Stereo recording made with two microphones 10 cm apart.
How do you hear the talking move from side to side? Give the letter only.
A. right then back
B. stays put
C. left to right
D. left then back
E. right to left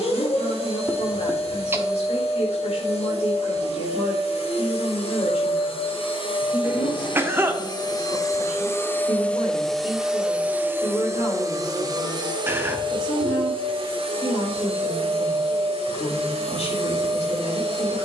B.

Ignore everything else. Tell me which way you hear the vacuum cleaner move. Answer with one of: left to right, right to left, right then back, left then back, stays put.
left to right.